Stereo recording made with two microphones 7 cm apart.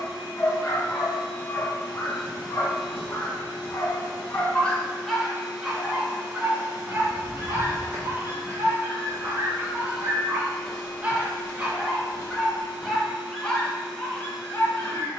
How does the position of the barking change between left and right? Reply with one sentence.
In this clip you hear the barking go right and come back.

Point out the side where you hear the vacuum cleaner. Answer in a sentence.
In this clip you hear the vacuum cleaner in the centre.